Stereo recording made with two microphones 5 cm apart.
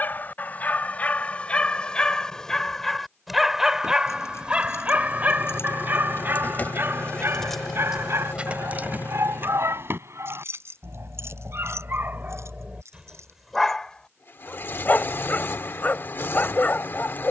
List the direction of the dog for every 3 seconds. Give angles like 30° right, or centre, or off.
20° left, 20° right, 60° right, 60° right, 10° right, 30° left.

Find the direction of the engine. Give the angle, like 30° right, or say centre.
50° left.